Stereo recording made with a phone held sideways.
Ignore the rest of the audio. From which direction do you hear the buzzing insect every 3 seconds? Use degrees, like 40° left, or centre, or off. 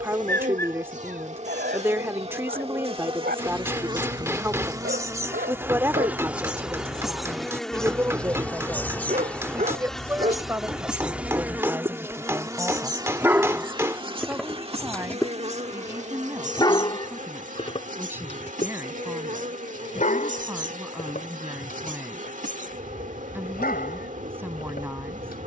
40° right, 20° right, centre, centre, 30° right, 50° right, 50° right, 50° right, 50° right.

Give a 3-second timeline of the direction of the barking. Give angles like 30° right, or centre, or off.
70° right, 70° right, 60° right, 40° right, centre, 20° left, 50° left, 60° left, 60° left.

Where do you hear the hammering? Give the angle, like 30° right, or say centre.
20° right.